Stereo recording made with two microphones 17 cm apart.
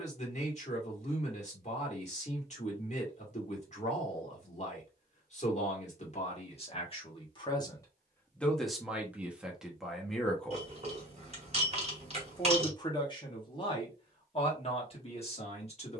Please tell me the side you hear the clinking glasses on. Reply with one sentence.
In this clip you hear the clinking glasses on the right.